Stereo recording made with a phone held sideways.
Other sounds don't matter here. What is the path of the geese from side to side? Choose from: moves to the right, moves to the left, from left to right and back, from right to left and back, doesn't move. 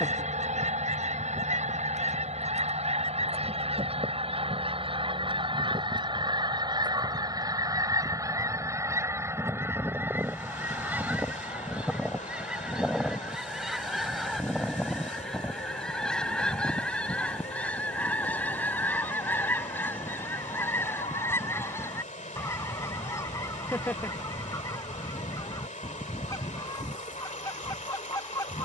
moves to the left.